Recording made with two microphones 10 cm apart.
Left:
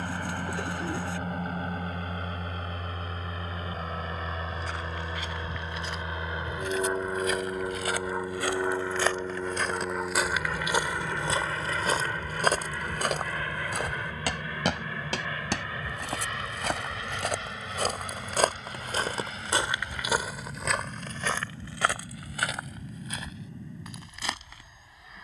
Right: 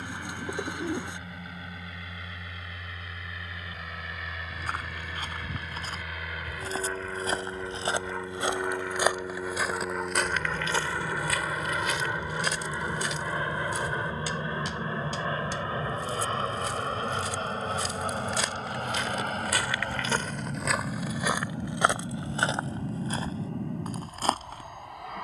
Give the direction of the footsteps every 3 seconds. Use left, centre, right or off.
off, right, right, centre, left, left, left, right, right.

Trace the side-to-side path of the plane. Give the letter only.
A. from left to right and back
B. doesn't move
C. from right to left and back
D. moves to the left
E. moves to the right
E.